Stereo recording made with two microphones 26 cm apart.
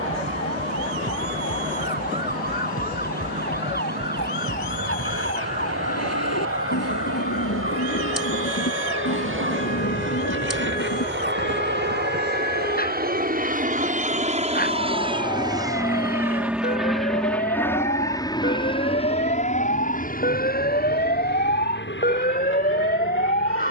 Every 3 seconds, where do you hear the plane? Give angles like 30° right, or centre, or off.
70° right, 70° right, 60° right, 50° right, 30° right, centre, 30° left, 50° left.